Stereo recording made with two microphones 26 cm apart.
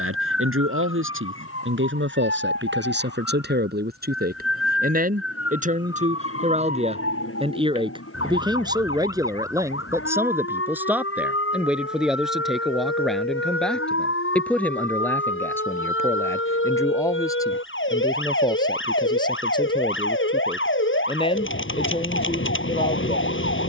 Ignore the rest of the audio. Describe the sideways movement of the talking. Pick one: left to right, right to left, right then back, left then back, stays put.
right to left.